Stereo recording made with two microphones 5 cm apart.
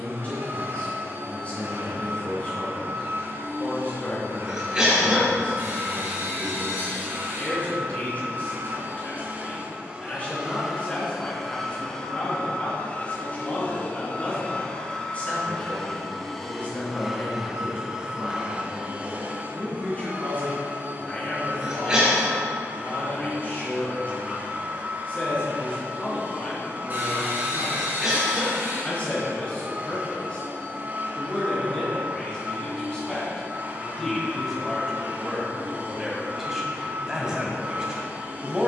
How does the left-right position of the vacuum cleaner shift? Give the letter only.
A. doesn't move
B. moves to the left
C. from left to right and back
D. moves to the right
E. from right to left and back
E.